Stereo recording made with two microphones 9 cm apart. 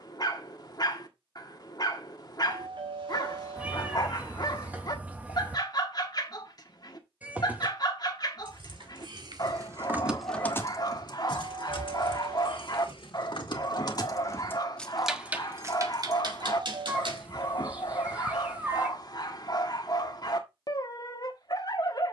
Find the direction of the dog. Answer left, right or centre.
left.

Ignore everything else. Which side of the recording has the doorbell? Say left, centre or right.
right.